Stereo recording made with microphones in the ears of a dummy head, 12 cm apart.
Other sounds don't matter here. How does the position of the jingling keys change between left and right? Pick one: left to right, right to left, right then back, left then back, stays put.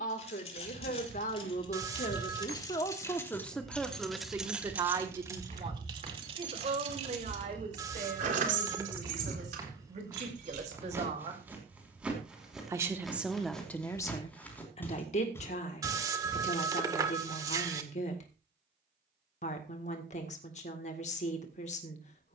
left to right.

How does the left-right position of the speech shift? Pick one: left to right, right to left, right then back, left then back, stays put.
right then back.